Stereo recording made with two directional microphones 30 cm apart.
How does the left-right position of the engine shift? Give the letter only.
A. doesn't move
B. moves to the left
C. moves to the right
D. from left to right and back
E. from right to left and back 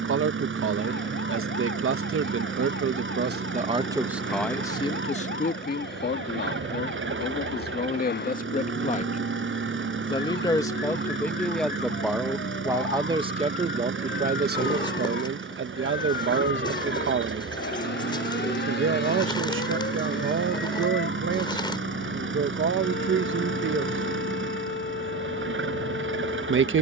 A.